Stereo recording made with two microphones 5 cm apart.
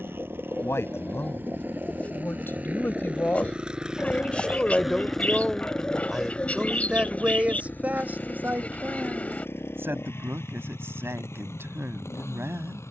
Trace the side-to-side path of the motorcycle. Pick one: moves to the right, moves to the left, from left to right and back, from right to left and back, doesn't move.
moves to the left.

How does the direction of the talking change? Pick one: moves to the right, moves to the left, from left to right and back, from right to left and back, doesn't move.
moves to the right.